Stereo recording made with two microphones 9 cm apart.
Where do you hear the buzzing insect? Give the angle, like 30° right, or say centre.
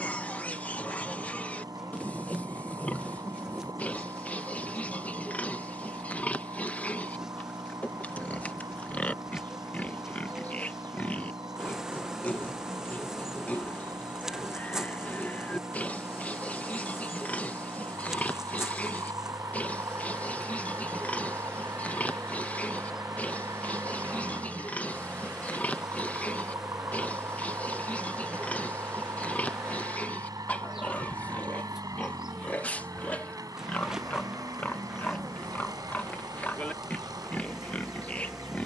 10° right.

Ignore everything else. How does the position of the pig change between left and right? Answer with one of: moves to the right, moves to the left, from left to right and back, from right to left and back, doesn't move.
doesn't move.